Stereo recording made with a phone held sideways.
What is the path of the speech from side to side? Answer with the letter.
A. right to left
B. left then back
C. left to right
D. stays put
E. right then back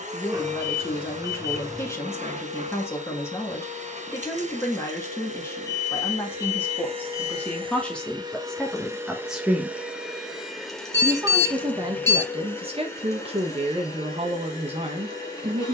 C.